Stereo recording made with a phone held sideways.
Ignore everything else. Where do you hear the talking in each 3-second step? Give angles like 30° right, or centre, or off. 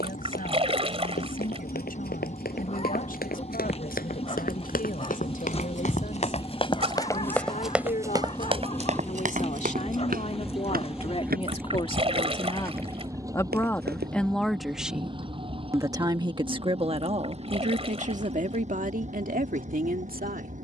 70° left, 60° left, 60° left, 40° left, 10° left, 30° right, 60° right.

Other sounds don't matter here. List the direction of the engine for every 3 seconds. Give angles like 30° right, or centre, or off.
50° left, 40° left, 20° left, centre, 20° right, 40° right, 50° right.